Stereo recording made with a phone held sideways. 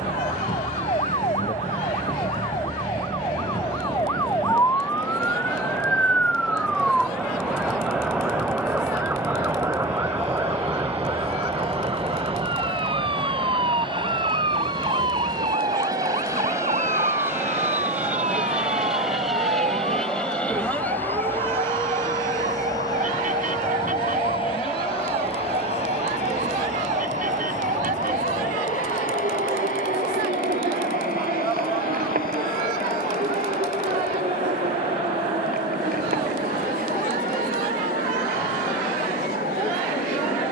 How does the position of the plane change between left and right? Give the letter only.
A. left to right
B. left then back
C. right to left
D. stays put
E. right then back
C.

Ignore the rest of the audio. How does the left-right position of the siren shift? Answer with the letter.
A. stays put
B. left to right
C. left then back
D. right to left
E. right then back
B.